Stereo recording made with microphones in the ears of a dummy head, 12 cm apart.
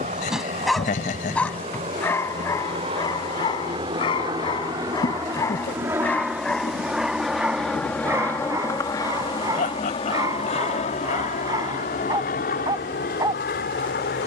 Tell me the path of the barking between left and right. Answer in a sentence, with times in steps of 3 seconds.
In this clip you hear the barking in the centre from 0 s, on the left from 3 s, in the centre from 6 s and on the right from 9 s.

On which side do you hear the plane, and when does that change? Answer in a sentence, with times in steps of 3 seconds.
You can hear the plane on the right from 0 s, in the centre from 6 s and on the left from 9 s.